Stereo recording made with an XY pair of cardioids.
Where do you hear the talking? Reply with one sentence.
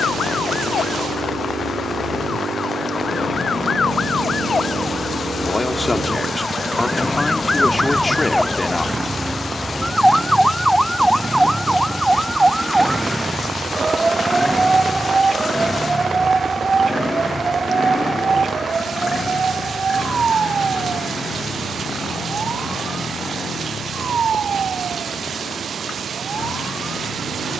In this clip you hear the talking on the left.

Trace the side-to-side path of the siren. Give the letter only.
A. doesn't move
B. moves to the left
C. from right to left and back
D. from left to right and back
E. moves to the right
E.